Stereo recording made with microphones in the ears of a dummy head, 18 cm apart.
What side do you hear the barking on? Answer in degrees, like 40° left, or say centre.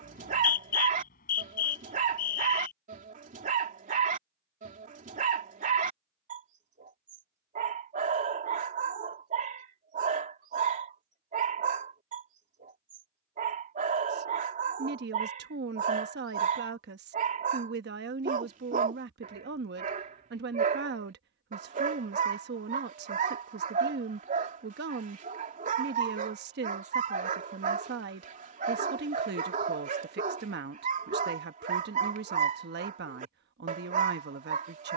40° right.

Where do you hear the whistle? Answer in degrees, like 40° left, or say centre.
50° left.